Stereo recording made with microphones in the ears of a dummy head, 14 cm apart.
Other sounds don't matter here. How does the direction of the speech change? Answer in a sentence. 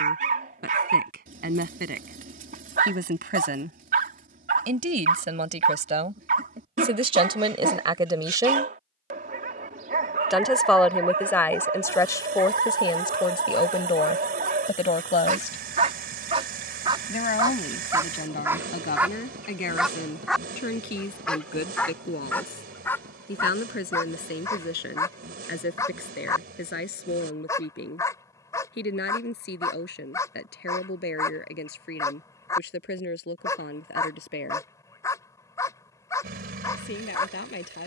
You can hear the speech move to the left.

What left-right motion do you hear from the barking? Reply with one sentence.
You can hear the barking move from right to left.